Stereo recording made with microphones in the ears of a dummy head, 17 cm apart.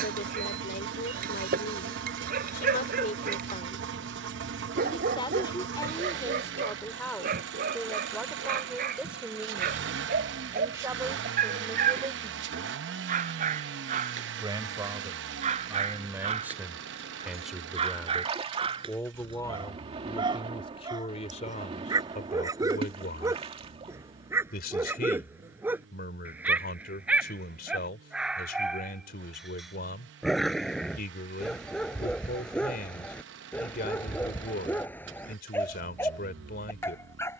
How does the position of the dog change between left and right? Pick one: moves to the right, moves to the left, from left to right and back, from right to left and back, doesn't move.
moves to the left.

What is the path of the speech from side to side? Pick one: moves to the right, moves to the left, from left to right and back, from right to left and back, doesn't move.
from left to right and back.